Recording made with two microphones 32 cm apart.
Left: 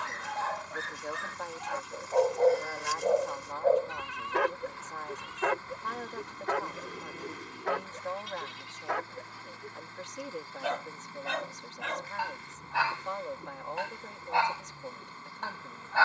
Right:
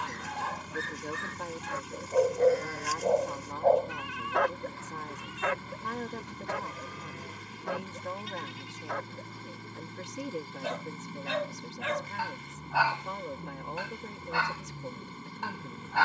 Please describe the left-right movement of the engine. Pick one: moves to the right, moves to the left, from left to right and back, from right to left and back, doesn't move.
doesn't move.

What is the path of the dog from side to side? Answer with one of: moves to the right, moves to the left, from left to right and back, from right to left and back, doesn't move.
from right to left and back.